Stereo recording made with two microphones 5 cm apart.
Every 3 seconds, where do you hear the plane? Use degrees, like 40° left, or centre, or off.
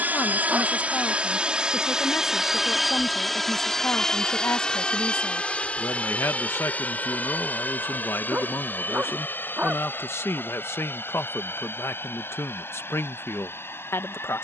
20° right, 20° left, 40° left, 50° left, 60° left.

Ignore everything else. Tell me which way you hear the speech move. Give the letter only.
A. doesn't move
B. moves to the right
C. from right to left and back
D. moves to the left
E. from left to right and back
A.